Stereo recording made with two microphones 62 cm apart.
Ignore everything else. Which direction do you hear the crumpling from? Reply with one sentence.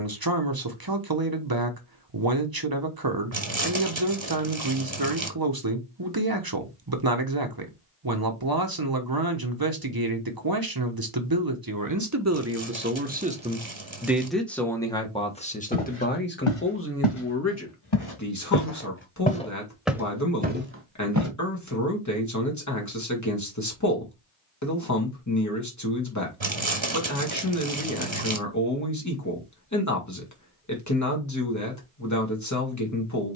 You can hear the crumpling on the right.